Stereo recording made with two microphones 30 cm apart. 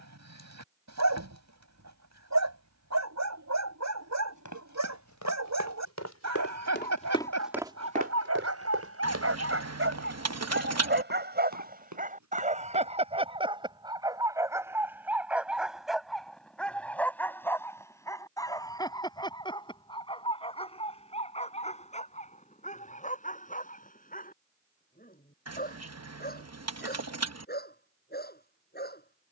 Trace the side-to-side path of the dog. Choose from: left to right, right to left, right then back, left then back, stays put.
right to left.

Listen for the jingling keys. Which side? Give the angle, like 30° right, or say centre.
60° right.